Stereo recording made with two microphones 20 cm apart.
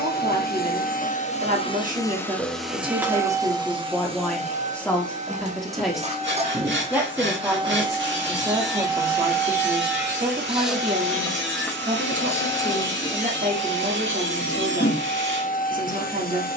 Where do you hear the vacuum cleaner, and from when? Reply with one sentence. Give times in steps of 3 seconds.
In this clip you hear the vacuum cleaner on the left from 0 s, on the right from 3 s, in the centre from 9 s and on the left from 12 s.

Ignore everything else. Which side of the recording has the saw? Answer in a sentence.
You can hear the saw on the right.